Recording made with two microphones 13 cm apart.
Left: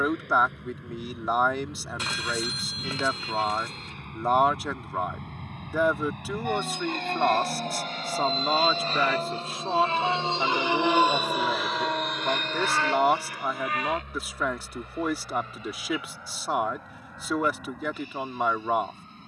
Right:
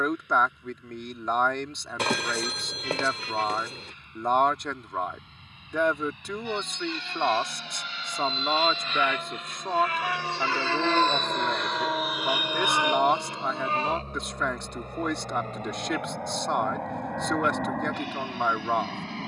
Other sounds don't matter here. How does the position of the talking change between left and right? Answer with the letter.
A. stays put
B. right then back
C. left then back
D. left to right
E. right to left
A.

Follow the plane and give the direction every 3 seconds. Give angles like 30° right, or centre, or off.
70° left, 60° left, 50° left, 20° left, 20° right, 50° right, 60° right.